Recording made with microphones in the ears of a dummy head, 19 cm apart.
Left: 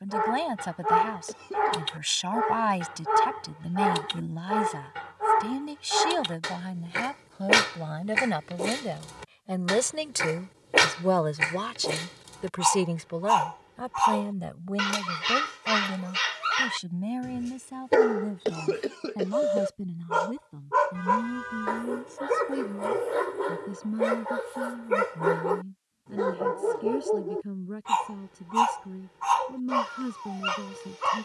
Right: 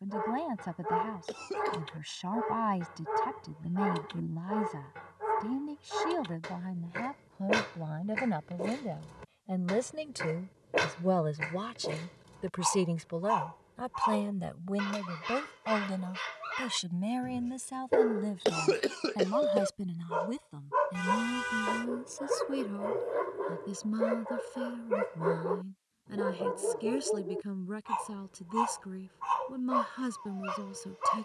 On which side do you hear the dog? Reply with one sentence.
In this clip you hear the dog on the left.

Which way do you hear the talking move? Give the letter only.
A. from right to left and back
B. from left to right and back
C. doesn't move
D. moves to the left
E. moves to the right
E.